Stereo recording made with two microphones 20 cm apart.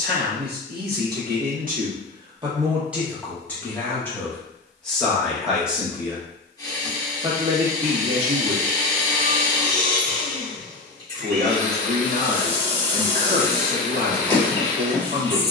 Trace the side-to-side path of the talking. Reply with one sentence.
You can hear the talking go left and come back.